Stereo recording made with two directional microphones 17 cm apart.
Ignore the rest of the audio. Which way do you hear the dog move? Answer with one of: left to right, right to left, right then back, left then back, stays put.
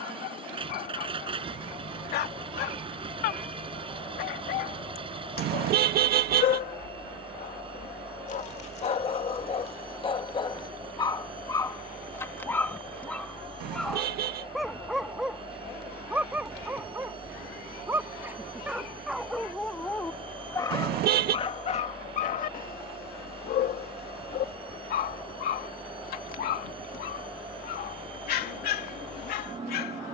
right then back.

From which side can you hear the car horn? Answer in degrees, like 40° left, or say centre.
70° right.